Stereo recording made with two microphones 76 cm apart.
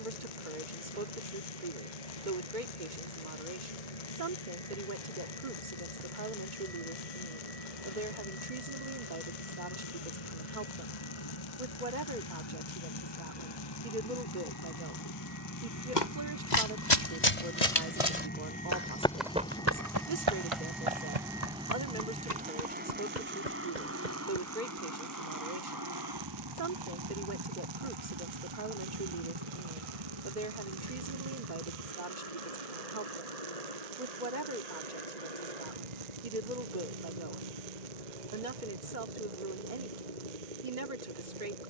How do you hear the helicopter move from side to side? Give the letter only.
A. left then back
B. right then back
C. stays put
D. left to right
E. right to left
D.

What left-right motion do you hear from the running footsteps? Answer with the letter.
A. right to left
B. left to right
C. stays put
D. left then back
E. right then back
B.